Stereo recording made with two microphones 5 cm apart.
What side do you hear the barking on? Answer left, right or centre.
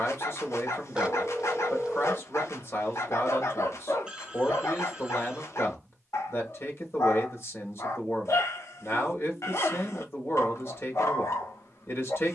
left.